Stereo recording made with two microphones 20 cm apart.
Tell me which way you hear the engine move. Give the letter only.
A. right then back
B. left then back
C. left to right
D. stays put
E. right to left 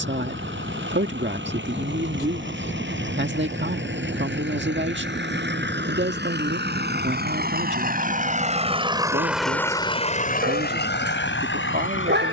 E.